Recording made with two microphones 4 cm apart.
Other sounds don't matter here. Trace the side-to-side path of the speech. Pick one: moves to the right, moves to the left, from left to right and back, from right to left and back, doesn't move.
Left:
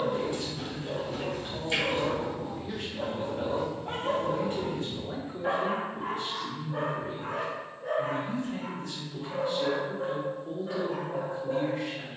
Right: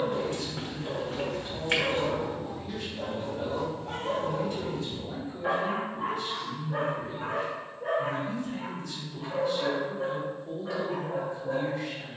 doesn't move.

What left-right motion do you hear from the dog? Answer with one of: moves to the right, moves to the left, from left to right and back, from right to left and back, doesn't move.
from right to left and back.